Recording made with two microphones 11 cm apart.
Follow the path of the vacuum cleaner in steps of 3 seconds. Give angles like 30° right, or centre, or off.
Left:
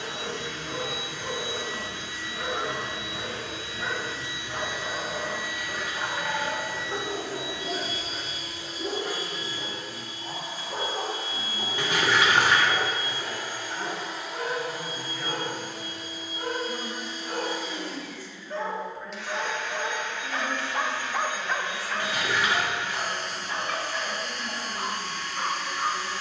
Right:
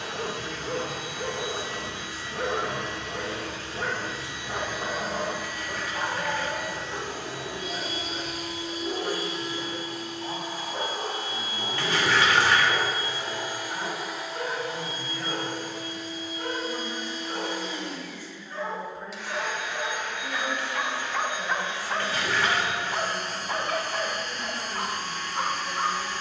60° right, 60° right, 60° right, 60° right, 20° right, 10° left, 10° right, 30° right, 50° right.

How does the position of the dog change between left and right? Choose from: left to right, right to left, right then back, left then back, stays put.
left then back.